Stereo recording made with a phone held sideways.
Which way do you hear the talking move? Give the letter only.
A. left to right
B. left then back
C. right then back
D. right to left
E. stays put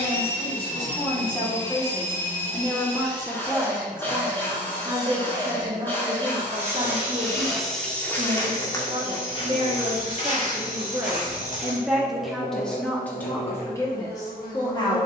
C.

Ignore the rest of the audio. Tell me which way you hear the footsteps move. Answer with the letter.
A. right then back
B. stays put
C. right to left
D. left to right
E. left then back
C.